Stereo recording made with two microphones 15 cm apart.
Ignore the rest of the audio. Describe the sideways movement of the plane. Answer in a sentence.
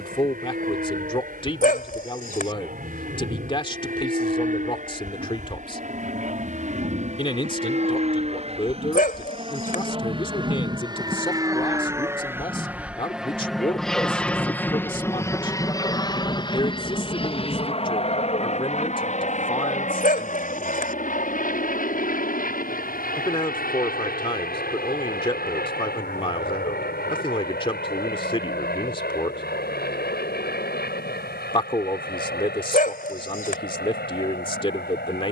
You can hear the plane move to the left.